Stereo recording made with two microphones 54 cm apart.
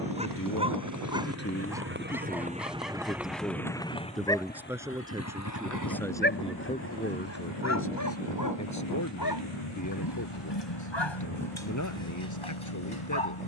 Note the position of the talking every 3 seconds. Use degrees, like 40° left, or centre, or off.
20° left, centre, 20° left, 30° left, 30° left.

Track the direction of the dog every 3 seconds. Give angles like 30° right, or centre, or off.
10° right, centre, 30° left, 50° left, 60° left.